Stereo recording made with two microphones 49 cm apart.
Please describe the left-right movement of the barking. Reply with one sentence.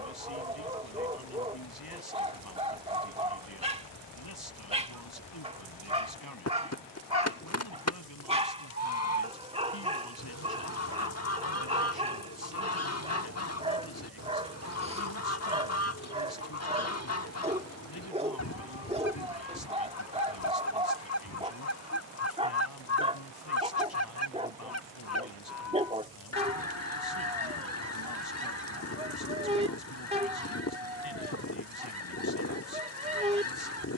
In this clip you hear the barking stay in one place.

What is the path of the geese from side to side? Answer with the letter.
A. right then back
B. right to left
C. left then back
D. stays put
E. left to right
D.